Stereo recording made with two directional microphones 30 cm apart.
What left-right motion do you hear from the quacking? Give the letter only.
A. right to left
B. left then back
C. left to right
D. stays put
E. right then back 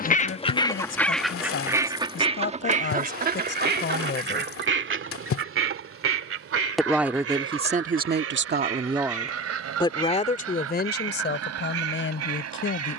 C.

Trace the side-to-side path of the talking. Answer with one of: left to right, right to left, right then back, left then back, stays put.
right then back.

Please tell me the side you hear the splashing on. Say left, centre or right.
left.